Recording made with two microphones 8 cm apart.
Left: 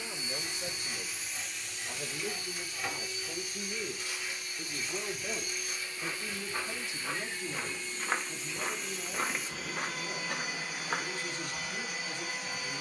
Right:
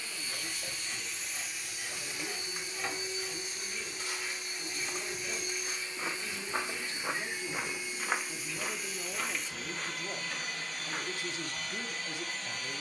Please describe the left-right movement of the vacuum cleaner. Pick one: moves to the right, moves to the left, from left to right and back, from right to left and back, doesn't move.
from left to right and back.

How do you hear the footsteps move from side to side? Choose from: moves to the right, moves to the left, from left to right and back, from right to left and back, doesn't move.
moves to the left.